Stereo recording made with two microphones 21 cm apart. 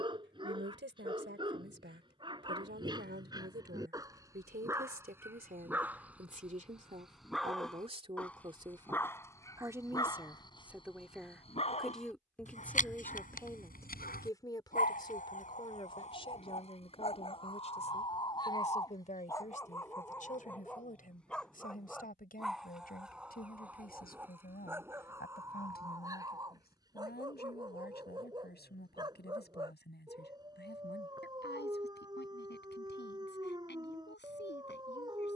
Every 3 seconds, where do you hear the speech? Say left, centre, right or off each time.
right, right, right, centre, centre, left, left, left, left, left, left, left.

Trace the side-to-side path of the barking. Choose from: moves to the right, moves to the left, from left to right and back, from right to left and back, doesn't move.
from right to left and back.